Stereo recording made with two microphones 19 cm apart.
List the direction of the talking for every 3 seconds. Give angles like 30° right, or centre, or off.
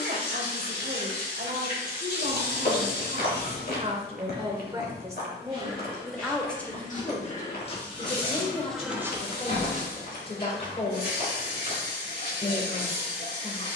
50° right, 20° right, 20° left, 30° left, 30° left.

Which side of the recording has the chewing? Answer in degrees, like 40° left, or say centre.
50° left.